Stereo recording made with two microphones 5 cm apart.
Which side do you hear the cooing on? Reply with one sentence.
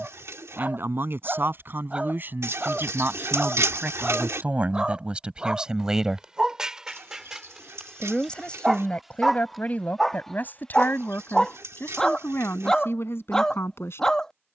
In this clip you hear the cooing on the right.